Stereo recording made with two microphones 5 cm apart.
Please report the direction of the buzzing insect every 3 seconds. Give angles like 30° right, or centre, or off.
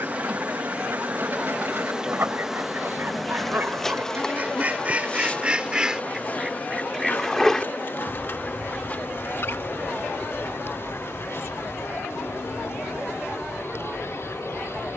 20° right, 20° left, 40° left, 60° left, 60° left.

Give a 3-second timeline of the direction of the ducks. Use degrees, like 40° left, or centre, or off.
50° right, 30° right, 10° left, 50° left, 60° left.